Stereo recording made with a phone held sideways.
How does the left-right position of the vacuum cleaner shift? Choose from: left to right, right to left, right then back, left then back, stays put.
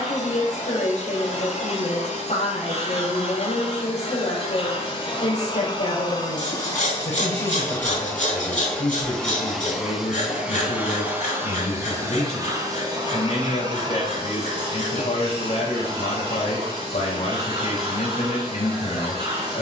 left to right.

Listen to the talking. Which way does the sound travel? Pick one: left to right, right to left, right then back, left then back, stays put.
stays put.